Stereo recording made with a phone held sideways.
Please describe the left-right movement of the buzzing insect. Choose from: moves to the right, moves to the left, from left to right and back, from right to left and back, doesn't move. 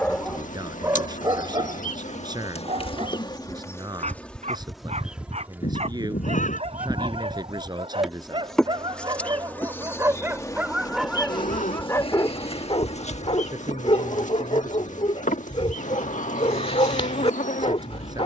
from left to right and back.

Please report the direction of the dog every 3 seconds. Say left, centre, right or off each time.
right, right, right, centre, left, left.